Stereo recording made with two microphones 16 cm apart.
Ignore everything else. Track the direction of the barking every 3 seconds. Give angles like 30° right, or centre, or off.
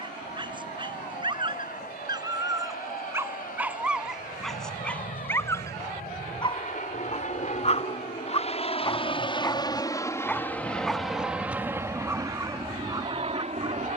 30° right, centre, 40° left, 10° left, 20° right.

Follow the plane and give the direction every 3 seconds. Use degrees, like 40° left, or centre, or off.
80° left, 70° left, 50° left, 10° left, 30° right.